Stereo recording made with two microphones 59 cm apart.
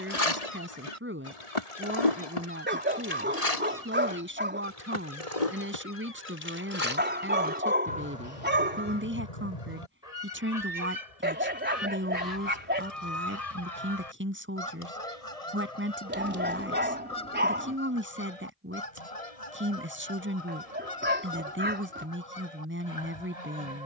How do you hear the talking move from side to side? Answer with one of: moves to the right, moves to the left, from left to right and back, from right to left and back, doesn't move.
doesn't move.